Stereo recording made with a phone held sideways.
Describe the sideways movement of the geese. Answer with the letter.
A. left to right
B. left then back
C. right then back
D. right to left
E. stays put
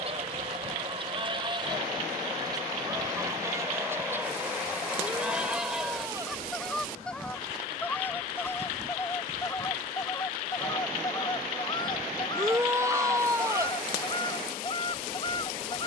D.